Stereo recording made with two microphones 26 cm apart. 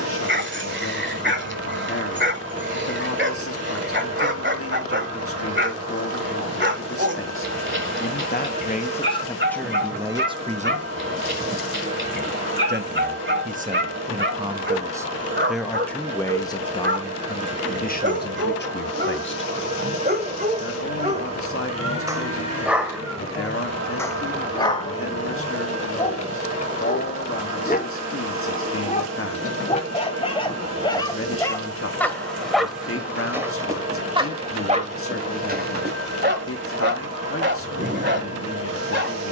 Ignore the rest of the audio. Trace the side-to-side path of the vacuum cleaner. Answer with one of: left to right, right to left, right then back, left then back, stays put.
stays put.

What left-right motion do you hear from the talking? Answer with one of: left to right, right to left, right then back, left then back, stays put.
right then back.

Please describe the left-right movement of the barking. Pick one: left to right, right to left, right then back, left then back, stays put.
left then back.